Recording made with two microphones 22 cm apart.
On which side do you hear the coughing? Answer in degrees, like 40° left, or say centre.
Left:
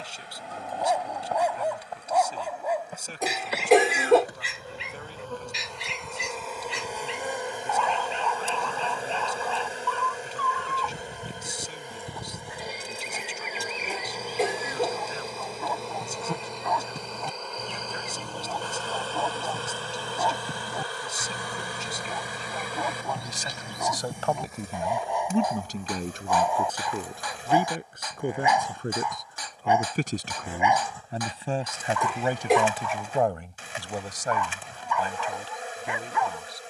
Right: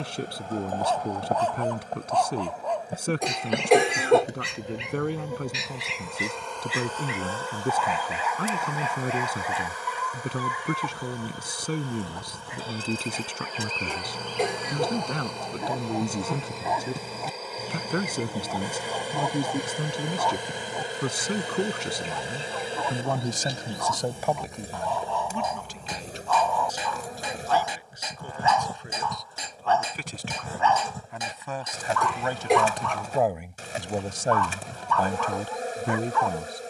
centre.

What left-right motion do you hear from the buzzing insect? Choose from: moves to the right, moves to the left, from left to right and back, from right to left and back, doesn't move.
from right to left and back.